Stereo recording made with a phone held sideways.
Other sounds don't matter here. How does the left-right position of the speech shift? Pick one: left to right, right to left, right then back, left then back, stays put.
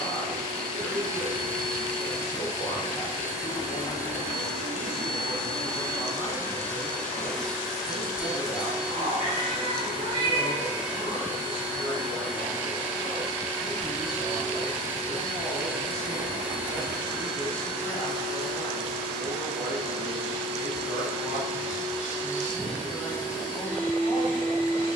stays put.